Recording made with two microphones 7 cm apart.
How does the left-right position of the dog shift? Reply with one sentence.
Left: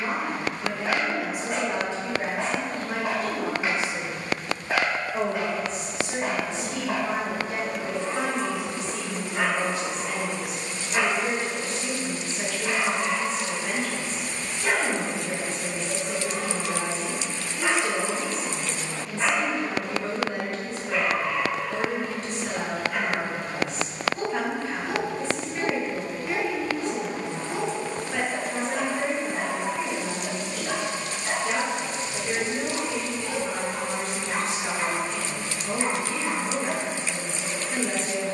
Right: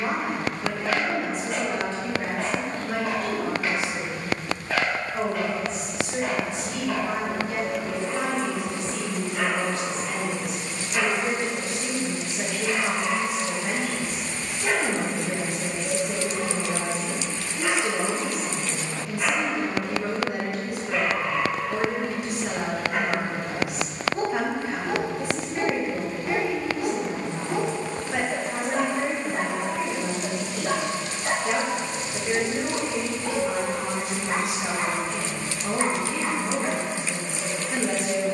In this clip you hear the dog go from the left side to the right.